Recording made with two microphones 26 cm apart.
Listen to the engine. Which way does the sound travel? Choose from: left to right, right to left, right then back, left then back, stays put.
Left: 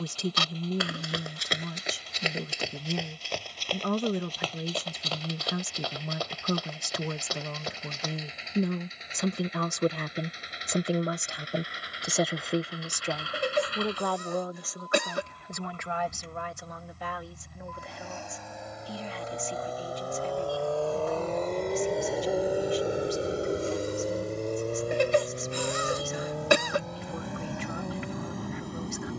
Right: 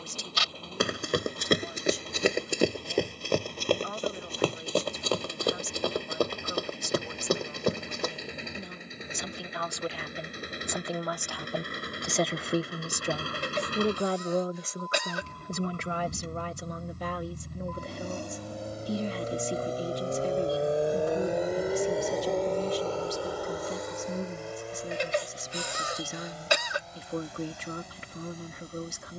right to left.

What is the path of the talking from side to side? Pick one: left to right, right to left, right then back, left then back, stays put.
left to right.